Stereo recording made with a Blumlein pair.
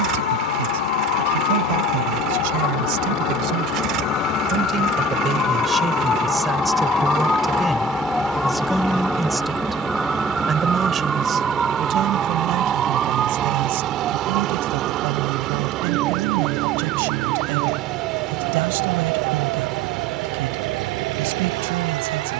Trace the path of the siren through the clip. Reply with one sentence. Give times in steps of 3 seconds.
In this clip you hear the siren on the left from 0 s, in the centre from 6 s and on the right from 12 s.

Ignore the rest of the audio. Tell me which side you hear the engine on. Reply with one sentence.
You can hear the engine on the right.